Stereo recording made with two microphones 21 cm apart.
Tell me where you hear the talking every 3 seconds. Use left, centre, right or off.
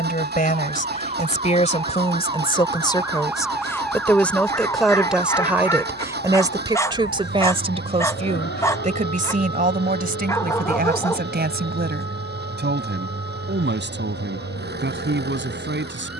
left, centre, right, right, right, right.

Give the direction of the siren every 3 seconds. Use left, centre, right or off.
right, centre, left, left, left, left.